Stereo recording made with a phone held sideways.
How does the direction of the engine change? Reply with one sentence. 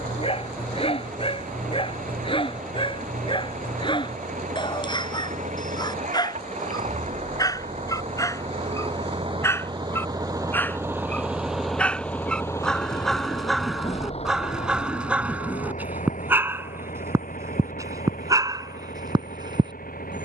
You can hear the engine move from right to left.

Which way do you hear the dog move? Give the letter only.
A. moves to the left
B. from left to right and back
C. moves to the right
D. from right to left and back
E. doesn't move
C.